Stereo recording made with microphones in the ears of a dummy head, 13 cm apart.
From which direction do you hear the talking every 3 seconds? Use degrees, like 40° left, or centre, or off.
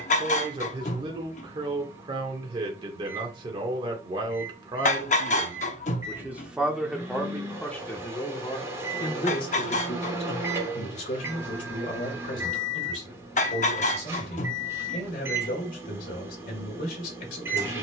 30° right, 30° right, centre, 40° left, 60° left, 60° left.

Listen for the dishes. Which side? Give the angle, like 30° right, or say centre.
50° left.